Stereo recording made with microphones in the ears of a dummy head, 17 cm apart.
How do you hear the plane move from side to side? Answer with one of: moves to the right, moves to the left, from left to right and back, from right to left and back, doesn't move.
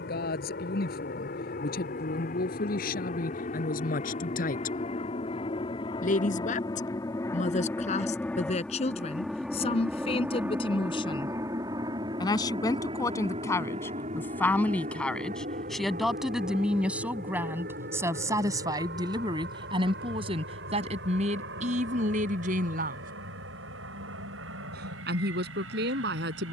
moves to the right.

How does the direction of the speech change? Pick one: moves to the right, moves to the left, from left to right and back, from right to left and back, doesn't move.
moves to the right.